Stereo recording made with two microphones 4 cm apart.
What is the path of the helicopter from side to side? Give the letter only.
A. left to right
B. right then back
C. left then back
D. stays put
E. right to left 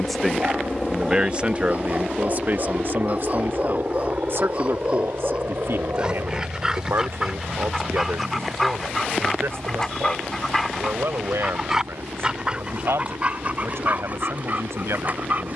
A.